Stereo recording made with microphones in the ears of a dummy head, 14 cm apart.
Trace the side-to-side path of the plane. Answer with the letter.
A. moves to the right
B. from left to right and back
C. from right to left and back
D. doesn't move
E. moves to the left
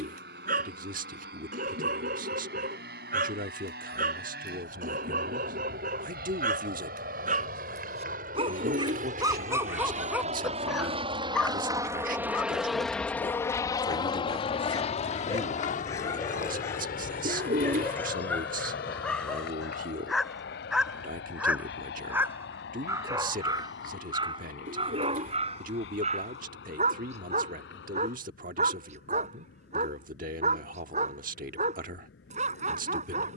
E.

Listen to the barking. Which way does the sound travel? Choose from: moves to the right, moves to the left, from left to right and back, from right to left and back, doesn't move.
from right to left and back.